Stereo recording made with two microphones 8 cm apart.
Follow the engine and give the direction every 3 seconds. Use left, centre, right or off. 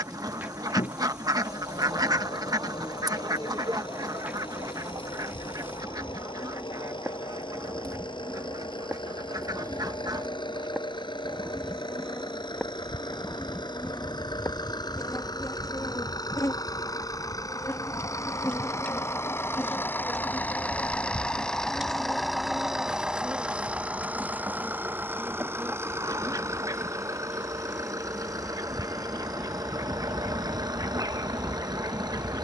left, left, left, left, left, left, left, centre, right, right, right.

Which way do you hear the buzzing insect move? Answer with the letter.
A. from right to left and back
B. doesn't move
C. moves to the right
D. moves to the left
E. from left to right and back
A.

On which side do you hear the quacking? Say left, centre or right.
right.